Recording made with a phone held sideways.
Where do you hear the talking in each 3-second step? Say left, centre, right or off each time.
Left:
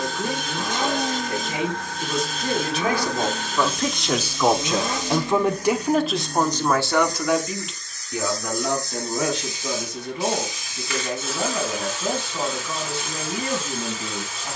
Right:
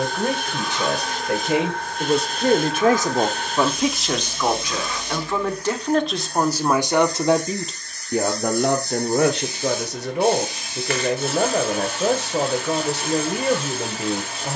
right, centre, right, right, right.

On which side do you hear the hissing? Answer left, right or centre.
right.